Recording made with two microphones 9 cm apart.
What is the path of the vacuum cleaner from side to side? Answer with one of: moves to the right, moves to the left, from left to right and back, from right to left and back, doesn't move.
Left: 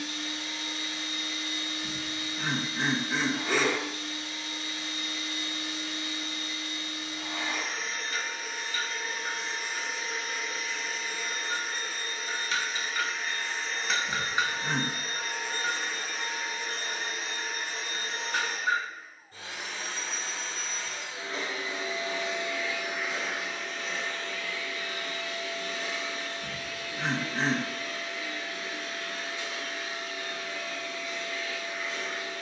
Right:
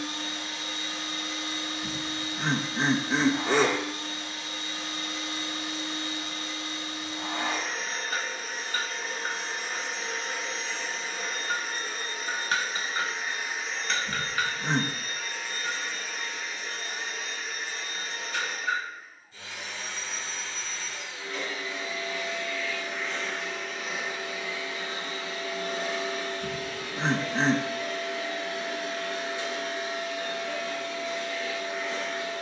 from right to left and back.